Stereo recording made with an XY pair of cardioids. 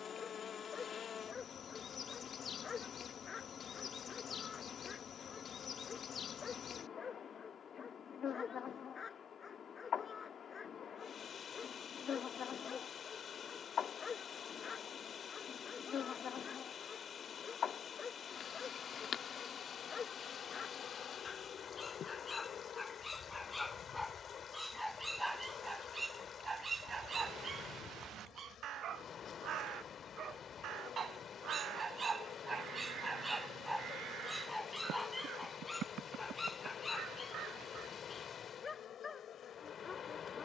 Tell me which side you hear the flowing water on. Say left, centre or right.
left.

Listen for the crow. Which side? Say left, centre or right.
right.